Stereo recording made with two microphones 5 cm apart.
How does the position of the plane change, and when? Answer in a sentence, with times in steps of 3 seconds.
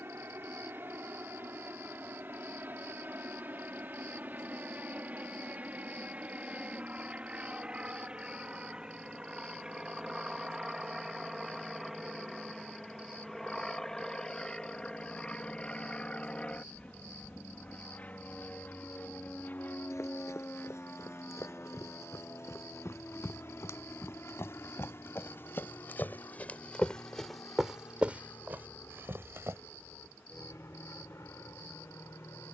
You can hear the plane on the right from 0 s, in the centre from 9 s and on the left from 15 s.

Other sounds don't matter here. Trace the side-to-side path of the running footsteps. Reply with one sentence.
In this clip you hear the running footsteps move to the right.